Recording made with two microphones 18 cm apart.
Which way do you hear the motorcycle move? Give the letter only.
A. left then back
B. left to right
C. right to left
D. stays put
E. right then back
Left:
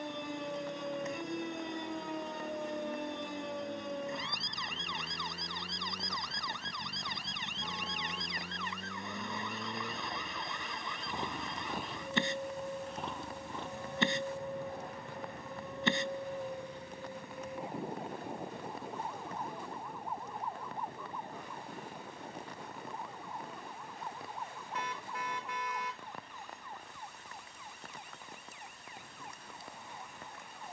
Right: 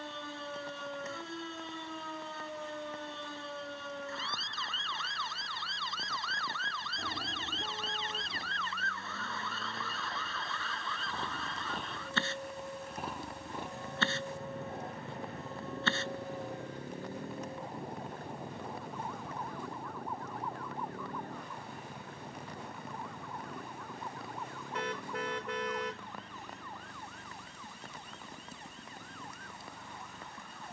B.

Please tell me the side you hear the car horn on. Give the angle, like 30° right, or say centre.
60° right.